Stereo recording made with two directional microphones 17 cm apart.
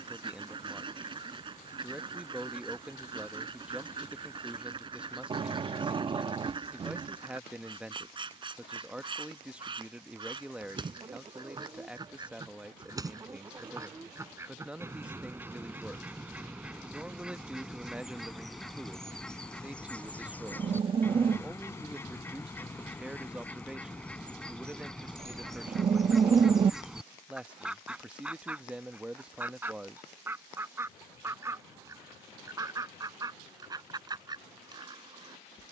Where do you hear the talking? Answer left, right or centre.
centre.